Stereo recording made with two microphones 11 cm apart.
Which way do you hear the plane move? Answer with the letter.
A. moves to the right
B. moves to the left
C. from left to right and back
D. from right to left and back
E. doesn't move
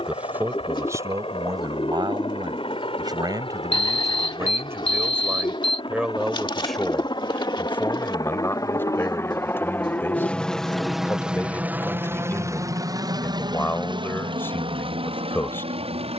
A.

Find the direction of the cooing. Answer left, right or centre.
left.